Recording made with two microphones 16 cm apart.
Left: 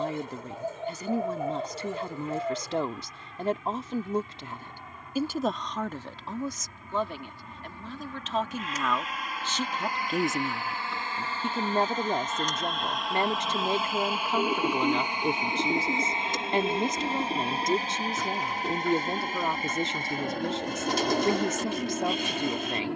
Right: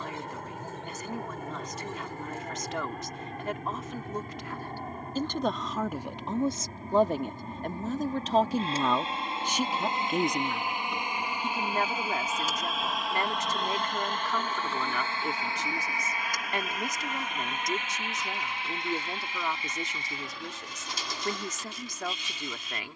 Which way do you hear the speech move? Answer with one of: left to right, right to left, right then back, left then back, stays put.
right then back.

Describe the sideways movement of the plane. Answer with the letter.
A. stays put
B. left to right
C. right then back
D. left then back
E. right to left
E.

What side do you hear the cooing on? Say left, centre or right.
left.